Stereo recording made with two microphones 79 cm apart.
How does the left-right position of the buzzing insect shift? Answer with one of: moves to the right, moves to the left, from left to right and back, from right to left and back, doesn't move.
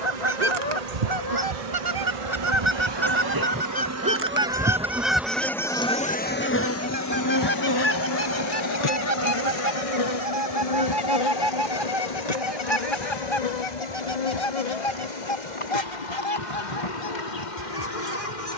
moves to the left.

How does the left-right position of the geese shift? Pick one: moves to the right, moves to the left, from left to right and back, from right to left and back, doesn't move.
moves to the left.